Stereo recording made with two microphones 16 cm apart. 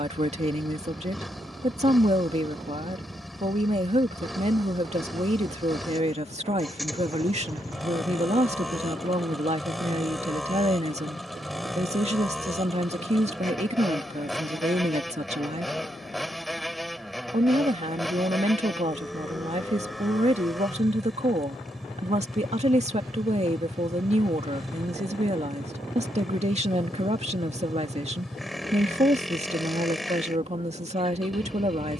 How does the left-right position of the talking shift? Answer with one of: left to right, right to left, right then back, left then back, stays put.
stays put.